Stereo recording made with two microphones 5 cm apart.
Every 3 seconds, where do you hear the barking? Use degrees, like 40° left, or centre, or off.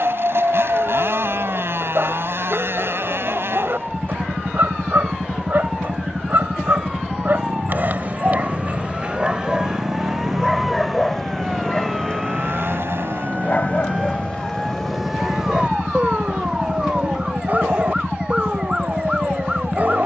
40° right, 40° right, 40° right, centre, 30° left, 30° right, 30° right.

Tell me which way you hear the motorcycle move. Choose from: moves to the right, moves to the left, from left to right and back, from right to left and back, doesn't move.
doesn't move.